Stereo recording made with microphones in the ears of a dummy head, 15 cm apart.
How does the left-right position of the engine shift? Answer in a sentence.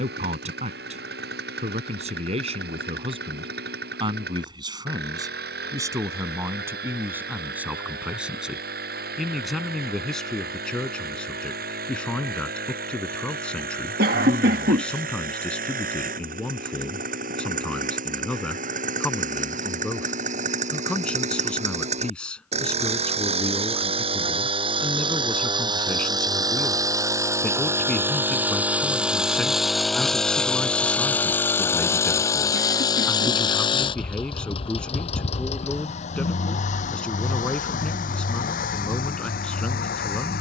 In this clip you hear the engine move to the left.